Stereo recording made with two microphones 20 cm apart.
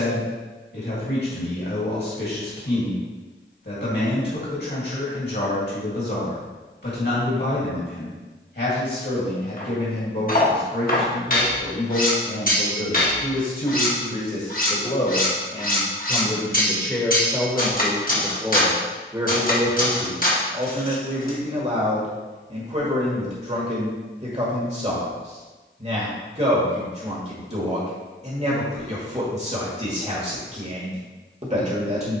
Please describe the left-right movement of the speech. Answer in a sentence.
In this clip you hear the speech go from the left side to the right.